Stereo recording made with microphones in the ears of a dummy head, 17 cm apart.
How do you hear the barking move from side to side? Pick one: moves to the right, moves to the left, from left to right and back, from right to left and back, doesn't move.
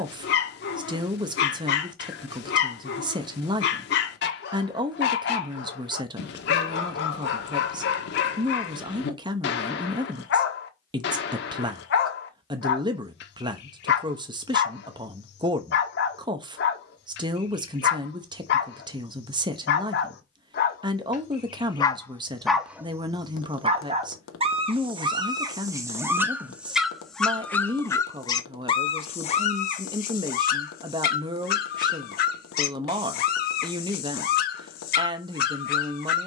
from left to right and back.